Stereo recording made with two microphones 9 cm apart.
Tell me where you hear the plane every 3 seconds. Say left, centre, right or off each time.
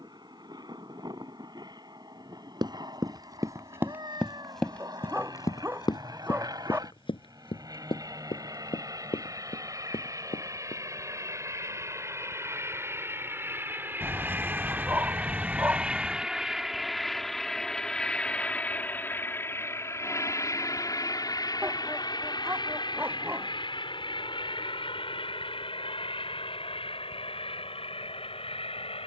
right, right, right, right, right, centre, left, left, left, left.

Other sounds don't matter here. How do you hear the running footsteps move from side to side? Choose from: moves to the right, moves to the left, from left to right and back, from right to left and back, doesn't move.
moves to the left.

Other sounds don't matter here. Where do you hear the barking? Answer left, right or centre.
right.